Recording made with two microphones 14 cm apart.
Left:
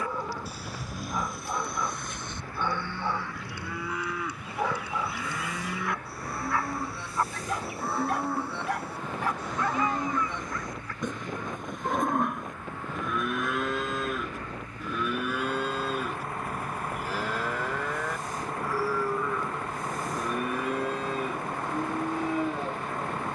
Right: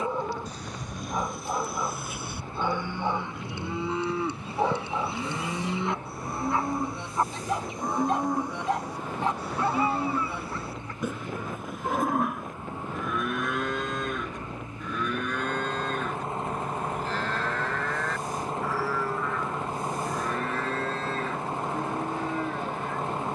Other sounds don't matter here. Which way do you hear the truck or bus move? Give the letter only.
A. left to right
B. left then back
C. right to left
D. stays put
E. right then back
D.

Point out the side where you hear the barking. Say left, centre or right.
right.